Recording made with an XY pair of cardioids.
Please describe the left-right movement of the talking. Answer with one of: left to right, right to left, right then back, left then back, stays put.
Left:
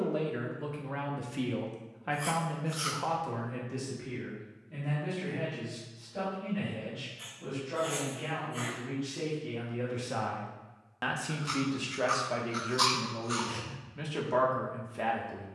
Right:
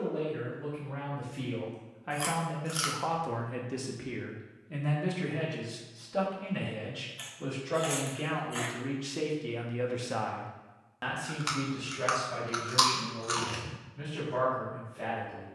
right then back.